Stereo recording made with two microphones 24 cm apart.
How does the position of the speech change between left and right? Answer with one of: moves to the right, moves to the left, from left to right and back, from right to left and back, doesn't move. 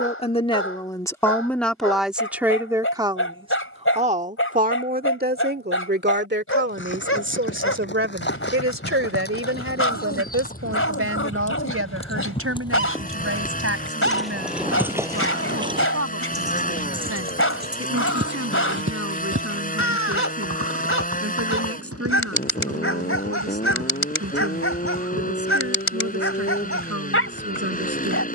moves to the right.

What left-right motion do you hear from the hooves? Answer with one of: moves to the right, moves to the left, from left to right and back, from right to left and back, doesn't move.
moves to the right.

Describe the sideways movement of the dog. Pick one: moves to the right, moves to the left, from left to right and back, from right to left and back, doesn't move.
doesn't move.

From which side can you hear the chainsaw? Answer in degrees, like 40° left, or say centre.
30° left.